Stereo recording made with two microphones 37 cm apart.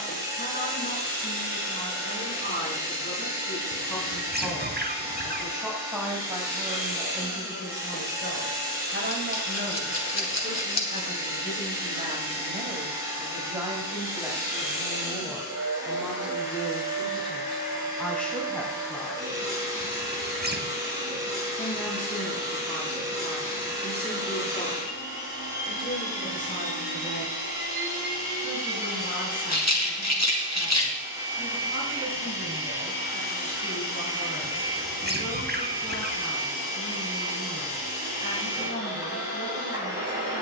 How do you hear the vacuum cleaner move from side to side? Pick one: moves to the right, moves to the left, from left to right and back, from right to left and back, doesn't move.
doesn't move.